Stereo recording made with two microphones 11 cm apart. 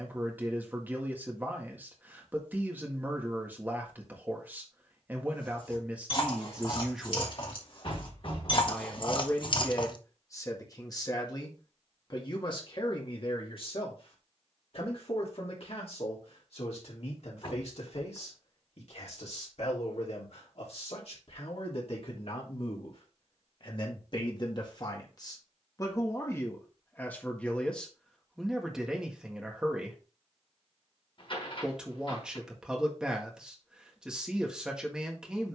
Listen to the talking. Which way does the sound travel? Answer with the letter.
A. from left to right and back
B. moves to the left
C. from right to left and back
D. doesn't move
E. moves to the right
C.